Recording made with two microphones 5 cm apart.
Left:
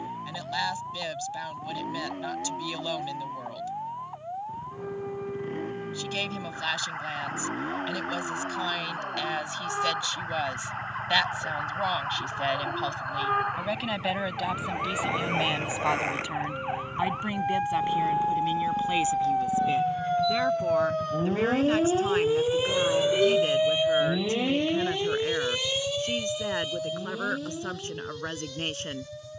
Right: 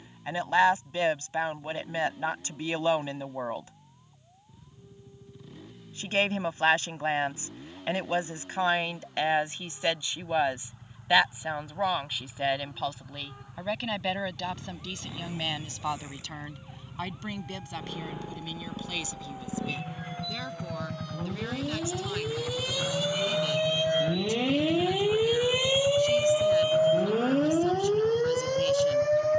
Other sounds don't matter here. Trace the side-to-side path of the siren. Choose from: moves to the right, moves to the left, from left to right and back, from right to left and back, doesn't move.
moves to the right.